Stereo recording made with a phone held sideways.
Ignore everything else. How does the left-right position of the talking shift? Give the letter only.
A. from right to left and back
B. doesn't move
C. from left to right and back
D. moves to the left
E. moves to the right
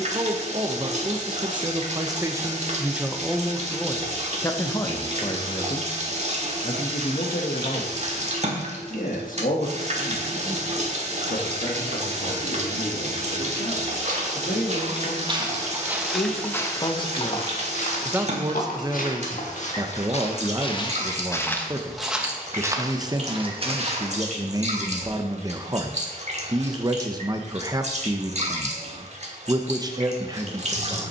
A.